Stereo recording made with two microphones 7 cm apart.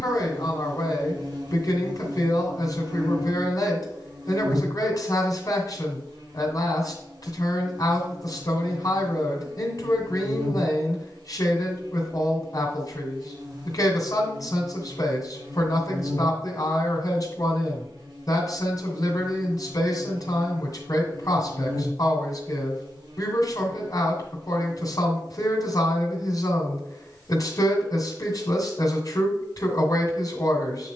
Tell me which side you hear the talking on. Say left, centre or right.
left.